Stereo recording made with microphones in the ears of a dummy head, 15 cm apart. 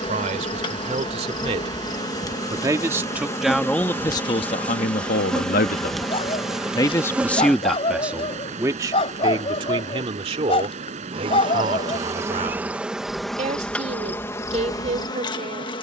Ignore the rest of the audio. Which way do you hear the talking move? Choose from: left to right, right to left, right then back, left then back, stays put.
left then back.